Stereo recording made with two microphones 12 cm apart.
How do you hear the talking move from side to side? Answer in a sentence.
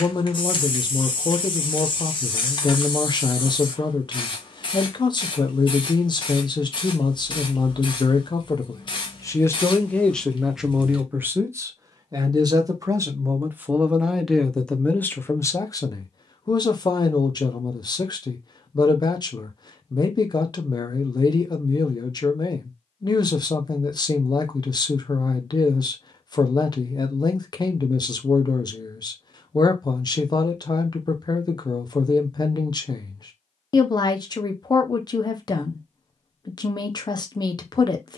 In this clip you hear the talking move from left to right and back again.